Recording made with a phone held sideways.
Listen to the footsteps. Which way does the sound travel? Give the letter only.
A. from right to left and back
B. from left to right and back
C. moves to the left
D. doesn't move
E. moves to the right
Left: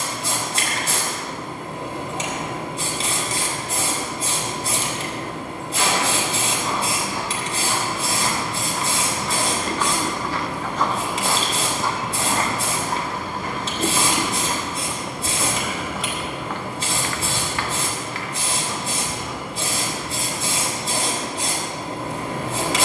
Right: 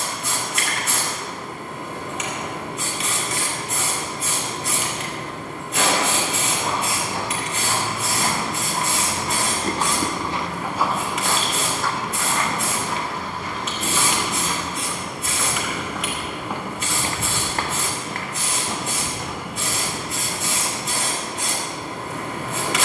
A.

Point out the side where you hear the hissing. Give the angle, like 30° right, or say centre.
30° left.